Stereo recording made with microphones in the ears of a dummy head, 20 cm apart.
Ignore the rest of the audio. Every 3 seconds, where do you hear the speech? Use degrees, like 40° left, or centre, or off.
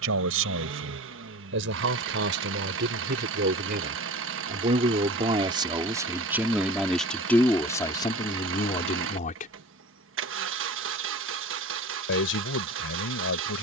60° right, 30° right, 10° left, 30° left, 60° left.